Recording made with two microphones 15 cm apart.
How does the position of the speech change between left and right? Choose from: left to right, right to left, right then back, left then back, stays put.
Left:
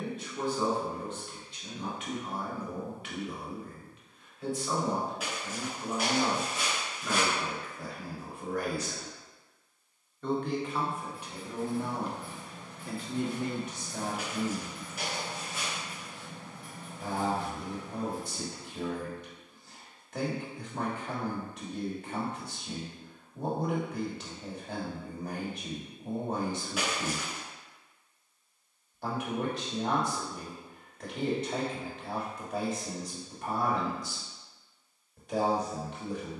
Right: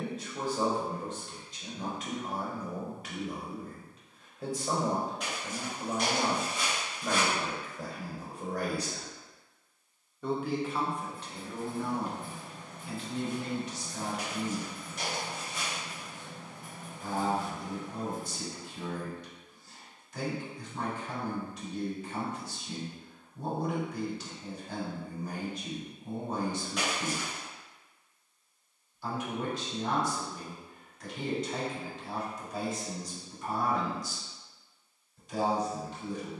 right to left.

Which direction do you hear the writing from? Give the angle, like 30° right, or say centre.
50° right.